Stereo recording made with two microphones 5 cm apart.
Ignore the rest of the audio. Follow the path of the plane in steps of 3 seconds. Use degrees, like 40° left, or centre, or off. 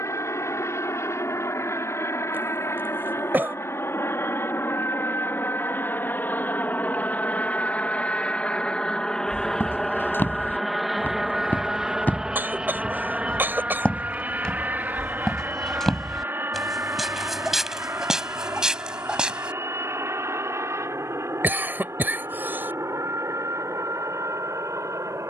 60° left, 50° left, 30° left, centre, 20° right, 40° right, 50° right, 50° right, 60° right.